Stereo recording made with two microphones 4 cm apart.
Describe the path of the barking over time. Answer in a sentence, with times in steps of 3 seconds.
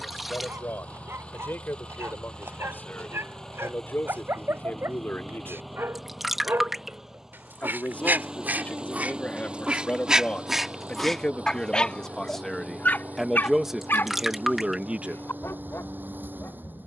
You can hear the barking on the right from 0 s, in the centre from 9 s and on the left from 12 s.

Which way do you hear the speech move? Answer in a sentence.
You can hear the speech move from left to right.